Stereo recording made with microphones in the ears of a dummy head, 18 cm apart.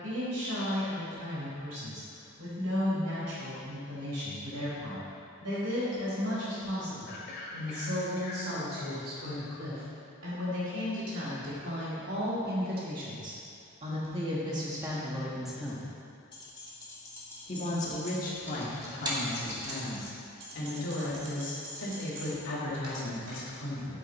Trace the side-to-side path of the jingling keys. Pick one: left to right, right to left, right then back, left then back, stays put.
left to right.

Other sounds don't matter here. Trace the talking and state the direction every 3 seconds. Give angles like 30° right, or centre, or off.
80° right, 80° right, 70° right, 60° right, 30° right, 10° left, 50° left, 60° left.